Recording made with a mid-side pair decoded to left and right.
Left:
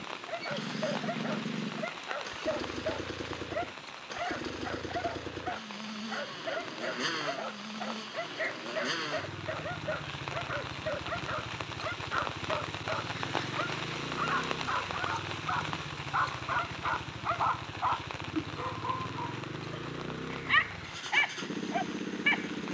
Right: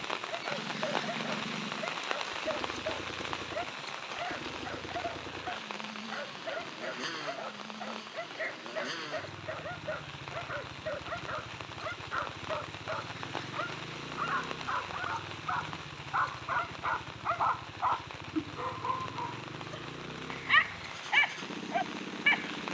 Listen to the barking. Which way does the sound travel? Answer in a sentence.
In this clip you hear the barking move to the right.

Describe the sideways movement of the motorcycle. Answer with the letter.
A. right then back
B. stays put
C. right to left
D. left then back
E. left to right
B.